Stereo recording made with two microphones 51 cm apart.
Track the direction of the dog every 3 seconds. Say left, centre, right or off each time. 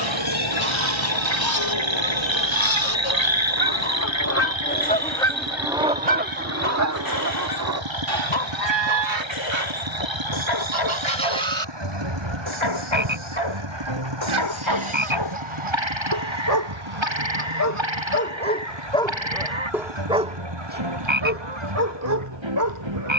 left, left, left, left, left, left, centre, right.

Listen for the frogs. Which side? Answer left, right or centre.
right.